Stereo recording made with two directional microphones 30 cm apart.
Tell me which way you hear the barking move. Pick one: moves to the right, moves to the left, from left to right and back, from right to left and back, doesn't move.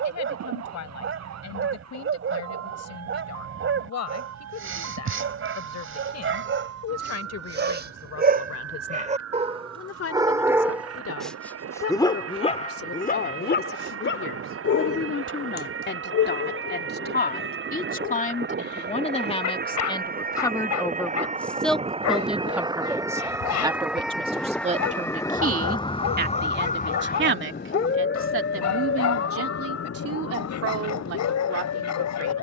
moves to the left.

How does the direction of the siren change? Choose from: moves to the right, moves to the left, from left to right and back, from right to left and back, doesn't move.
moves to the left.